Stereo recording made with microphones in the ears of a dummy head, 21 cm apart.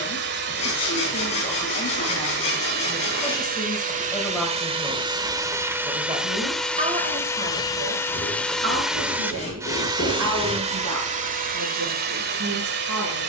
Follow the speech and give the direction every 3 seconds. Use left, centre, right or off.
left, centre, right, right, right.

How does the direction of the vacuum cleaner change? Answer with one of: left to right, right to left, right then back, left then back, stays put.
left then back.